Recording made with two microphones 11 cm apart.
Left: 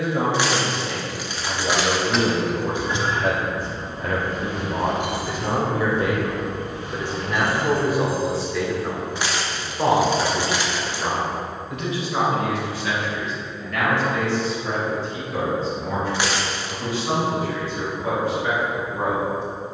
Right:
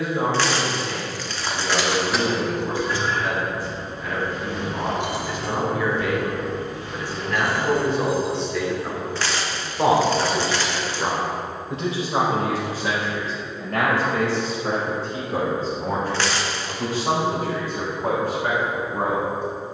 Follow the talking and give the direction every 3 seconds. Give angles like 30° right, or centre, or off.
70° left, 50° left, 20° left, 20° right, 40° right, 50° right, 60° right.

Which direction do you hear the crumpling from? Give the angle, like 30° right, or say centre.
10° left.